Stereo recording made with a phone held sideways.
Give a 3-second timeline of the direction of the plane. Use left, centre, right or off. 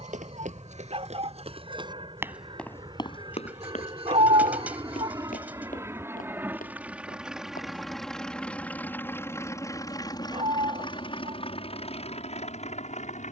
right, right, centre, left, left.